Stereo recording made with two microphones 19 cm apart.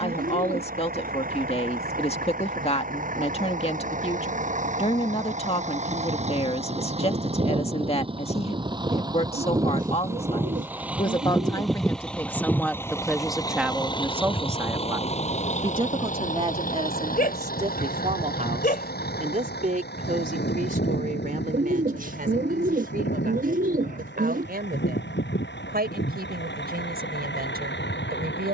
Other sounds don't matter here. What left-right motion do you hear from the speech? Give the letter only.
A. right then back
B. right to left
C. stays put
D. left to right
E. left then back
D.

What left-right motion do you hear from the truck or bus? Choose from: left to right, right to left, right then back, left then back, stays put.
right to left.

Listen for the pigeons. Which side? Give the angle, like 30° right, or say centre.
50° right.